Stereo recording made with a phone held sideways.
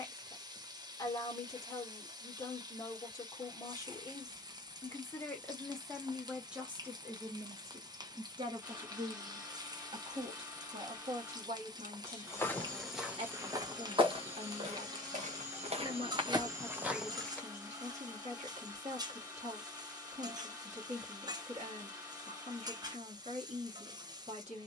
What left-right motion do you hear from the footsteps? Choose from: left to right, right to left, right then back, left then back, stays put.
right then back.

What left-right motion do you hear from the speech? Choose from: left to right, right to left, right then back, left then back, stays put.
left to right.